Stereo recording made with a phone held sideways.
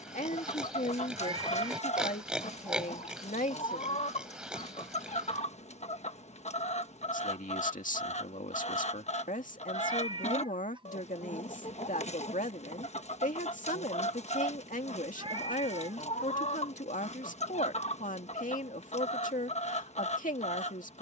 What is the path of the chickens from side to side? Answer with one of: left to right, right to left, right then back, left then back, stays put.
stays put.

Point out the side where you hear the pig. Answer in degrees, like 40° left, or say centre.
10° right.